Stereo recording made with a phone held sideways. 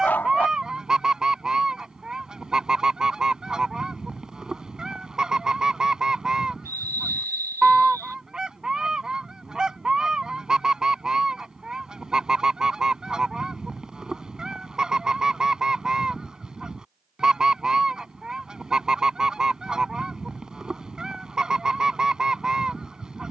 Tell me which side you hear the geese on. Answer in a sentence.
In this clip you hear the geese in the centre.